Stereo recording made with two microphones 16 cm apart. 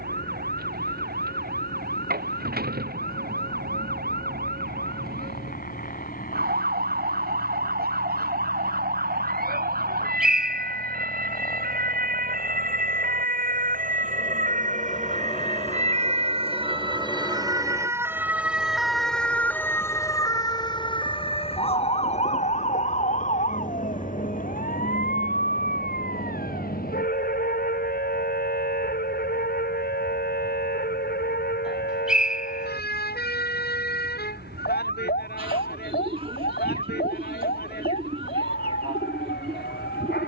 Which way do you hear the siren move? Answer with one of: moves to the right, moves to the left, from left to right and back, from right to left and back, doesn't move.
moves to the left.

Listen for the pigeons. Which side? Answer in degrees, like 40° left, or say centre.
30° right.